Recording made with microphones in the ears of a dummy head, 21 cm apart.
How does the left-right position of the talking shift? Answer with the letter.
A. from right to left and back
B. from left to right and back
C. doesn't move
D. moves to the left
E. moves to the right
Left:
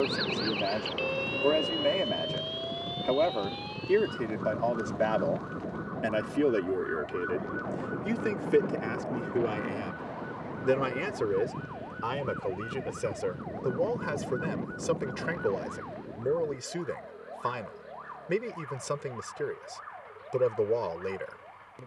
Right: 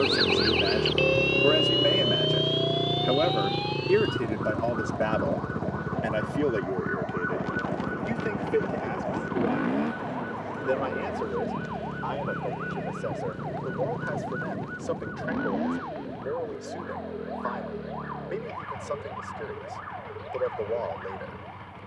D.